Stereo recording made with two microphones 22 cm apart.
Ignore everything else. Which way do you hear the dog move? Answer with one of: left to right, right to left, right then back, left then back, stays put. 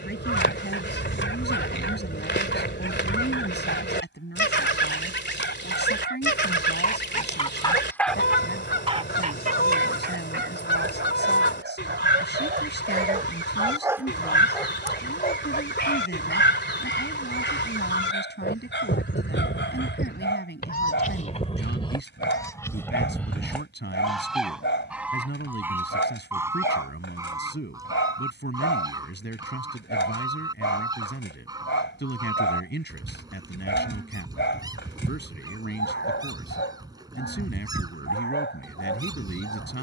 right then back.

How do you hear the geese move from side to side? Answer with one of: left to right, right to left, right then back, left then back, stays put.
left to right.